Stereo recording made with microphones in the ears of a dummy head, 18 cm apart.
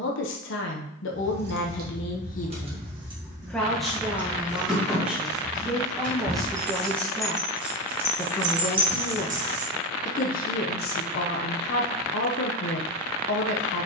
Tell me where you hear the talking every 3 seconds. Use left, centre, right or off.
left, centre, centre, left, left.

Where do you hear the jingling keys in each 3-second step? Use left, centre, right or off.
right, centre, centre, right, off.